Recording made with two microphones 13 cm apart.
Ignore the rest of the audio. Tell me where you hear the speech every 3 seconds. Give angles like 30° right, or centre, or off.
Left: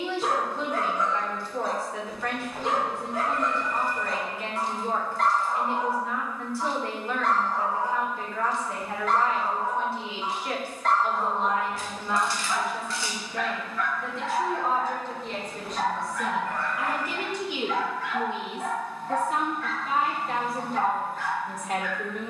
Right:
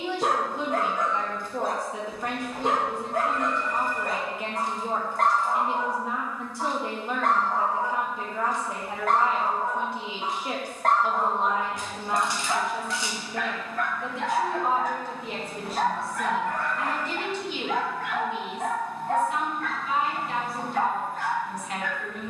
20° right, 20° right, 20° right, 20° right, 20° right, centre, 40° left, 50° left.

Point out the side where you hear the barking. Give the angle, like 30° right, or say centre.
50° right.